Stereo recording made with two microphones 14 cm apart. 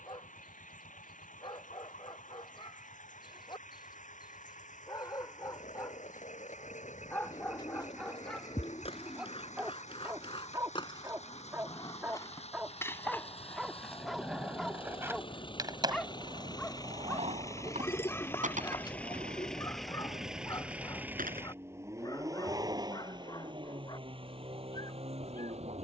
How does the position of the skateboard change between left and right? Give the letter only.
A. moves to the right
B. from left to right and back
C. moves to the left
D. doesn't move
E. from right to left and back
A.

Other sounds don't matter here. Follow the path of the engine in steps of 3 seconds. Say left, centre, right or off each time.
left, left, left, left, left, left, centre, right, right.